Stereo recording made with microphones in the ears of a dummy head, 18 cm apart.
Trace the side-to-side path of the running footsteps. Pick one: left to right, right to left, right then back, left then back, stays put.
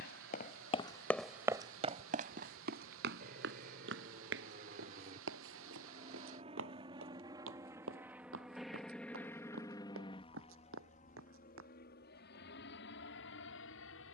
left to right.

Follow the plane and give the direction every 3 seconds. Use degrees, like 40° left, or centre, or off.
60° right, 40° right, 20° right, 30° left, 60° left.